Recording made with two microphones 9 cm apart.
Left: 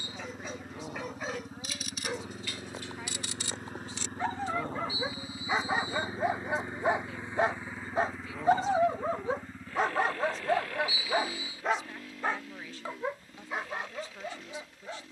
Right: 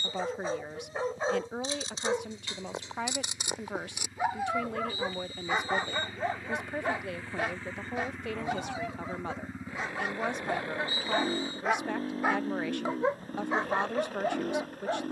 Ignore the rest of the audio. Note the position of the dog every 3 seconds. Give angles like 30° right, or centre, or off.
30° right, 10° right, 30° left, 30° left, 30° right.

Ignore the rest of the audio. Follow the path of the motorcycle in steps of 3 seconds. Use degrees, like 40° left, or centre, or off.
70° left, 50° left, 10° left, 20° right, 40° right.